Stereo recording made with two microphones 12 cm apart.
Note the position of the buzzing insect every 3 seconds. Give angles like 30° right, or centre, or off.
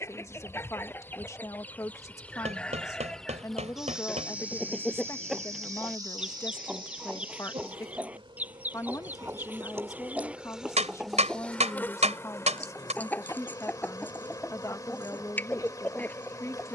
20° left, 10° right, 40° right, 10° right, 30° left, 30° left.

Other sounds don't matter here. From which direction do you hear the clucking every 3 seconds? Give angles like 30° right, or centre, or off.
10° left, centre, 10° right, 10° right, 10° left, 10° left.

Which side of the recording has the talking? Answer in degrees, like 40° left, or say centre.
20° left.